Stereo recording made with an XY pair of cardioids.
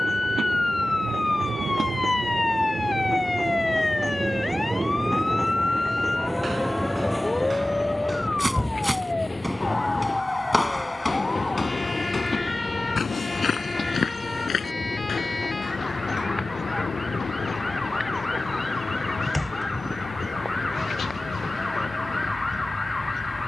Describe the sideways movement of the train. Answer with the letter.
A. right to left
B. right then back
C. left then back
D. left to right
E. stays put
A.